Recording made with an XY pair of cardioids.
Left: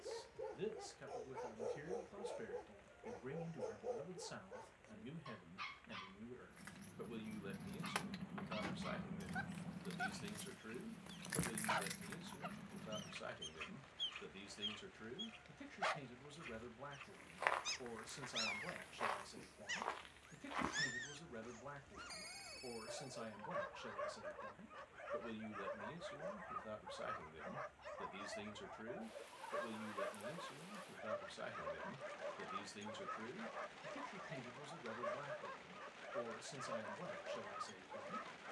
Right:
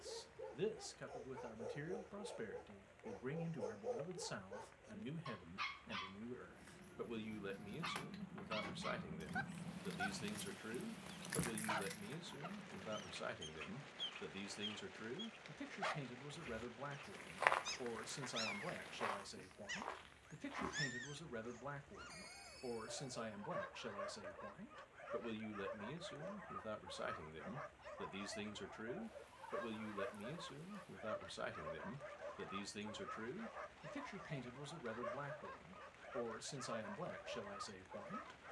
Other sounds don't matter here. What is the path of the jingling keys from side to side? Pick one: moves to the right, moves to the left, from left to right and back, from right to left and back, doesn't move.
from left to right and back.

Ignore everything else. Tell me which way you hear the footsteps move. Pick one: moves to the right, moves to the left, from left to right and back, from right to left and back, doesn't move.
moves to the left.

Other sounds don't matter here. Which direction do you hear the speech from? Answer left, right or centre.
right.